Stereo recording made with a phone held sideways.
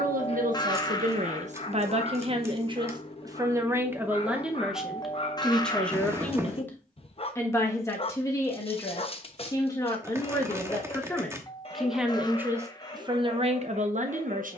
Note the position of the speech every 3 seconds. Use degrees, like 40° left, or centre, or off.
50° right, 10° right, 20° left, 20° left, 40° right.